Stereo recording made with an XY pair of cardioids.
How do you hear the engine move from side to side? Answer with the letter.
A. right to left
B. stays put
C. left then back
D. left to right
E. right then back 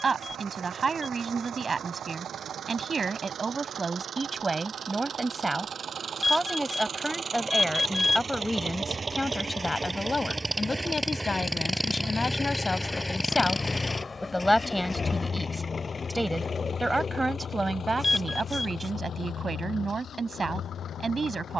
A.